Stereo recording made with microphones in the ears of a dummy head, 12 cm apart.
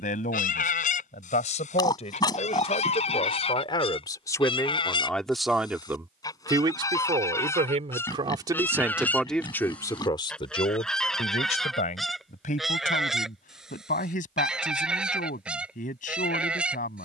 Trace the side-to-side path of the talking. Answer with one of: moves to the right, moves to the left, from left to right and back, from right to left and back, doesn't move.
from left to right and back.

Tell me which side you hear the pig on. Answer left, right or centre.
left.